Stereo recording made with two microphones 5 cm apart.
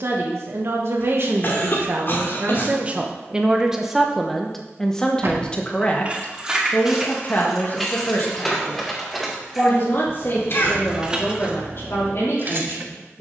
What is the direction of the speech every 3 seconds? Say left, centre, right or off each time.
right, centre, left, left, left.